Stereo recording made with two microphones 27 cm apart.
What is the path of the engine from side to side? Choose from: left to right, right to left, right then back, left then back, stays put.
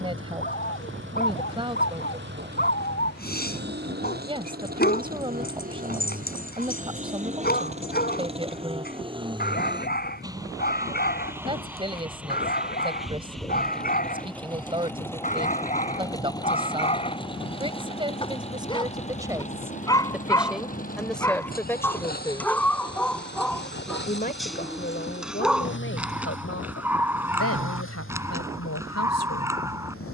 right to left.